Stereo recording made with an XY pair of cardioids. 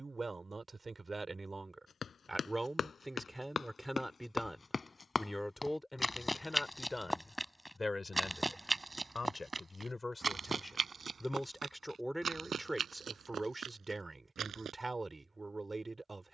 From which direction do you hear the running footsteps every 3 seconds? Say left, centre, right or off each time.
left, left, centre, right, right, off.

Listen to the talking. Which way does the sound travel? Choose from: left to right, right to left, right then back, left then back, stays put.
left then back.